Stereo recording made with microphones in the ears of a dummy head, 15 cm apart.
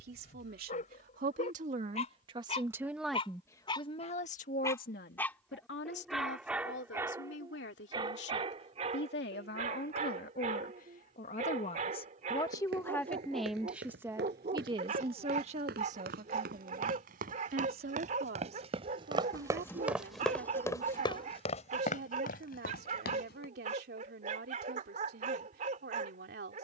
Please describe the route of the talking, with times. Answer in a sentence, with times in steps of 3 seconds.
In this clip you hear the talking on the right from 0 s, on the left from 3 s, in the centre from 12 s and on the right from 15 s.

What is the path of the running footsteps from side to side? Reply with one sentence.
In this clip you hear the running footsteps move to the left.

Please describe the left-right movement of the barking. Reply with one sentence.
In this clip you hear the barking go from the left side to the right.